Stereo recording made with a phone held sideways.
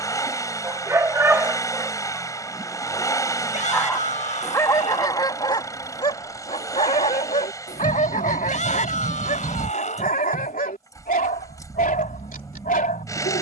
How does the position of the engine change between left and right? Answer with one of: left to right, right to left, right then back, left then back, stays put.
stays put.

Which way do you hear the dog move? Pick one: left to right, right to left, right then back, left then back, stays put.
right to left.